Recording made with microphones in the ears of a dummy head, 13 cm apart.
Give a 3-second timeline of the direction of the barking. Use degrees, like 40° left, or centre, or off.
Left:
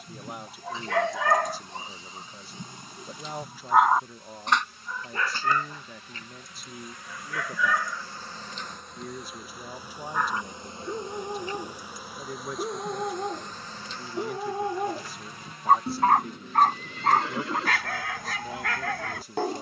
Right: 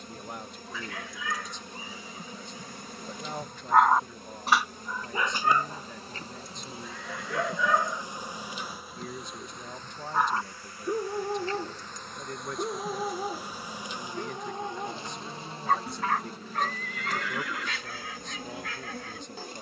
40° left, centre, 30° right, 10° right, 10° left, 40° left, 50° left.